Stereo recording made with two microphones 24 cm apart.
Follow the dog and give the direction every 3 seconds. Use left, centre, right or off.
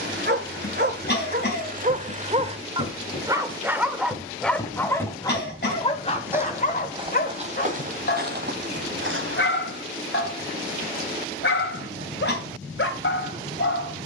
right, centre, left, left, left.